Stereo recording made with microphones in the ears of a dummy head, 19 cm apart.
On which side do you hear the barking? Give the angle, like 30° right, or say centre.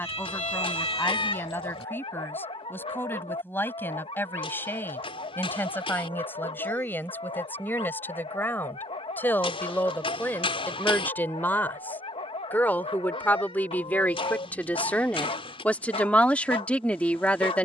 20° left.